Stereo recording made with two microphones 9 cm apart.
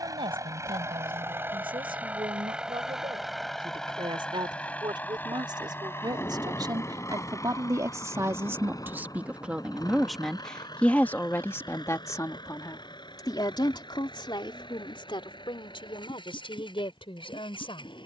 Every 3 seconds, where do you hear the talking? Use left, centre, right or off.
right, right, right, centre, left, left.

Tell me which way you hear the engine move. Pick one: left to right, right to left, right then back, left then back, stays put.
right to left.